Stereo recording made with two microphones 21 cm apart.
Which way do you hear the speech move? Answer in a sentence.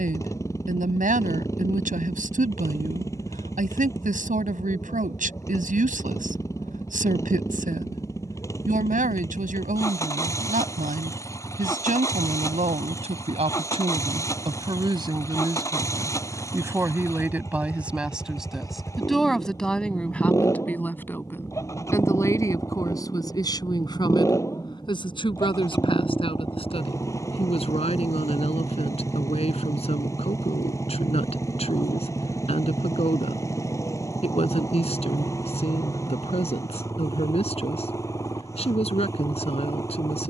You can hear the speech move from right to left.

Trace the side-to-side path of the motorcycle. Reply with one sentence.
You can hear the motorcycle stay in one place.